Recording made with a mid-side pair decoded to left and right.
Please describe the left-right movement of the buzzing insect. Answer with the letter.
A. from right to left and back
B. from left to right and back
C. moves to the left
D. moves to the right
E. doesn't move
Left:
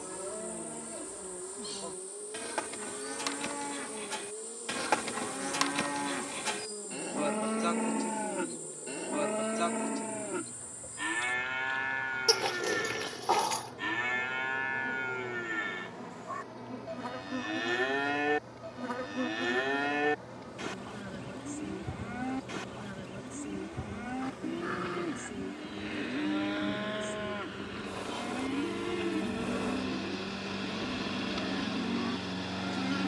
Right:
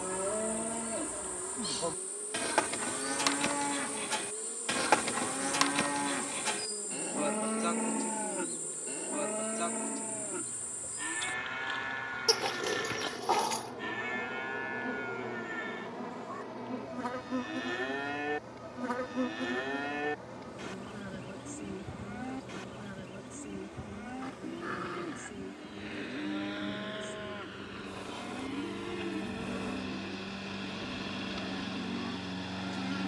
C.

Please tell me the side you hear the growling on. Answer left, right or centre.
centre.